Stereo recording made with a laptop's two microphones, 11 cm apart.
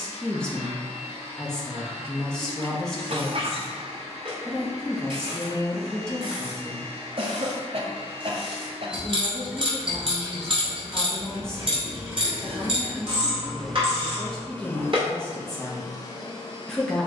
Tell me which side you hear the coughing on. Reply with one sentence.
You can hear the coughing on the right.